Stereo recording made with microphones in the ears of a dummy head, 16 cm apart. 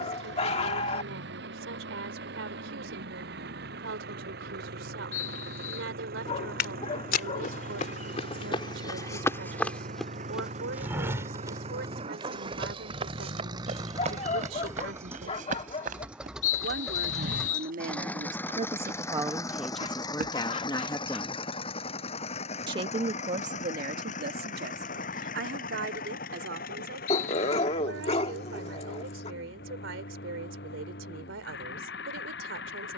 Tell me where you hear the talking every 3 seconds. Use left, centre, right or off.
right, right, right, right, right, right, centre, right, right, right, right.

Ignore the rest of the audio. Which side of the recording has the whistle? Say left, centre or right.
left.